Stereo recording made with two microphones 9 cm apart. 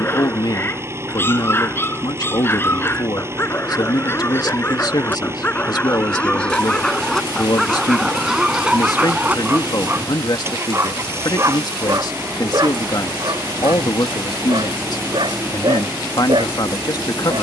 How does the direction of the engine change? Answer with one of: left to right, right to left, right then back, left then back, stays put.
stays put.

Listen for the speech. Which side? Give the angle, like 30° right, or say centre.
50° left.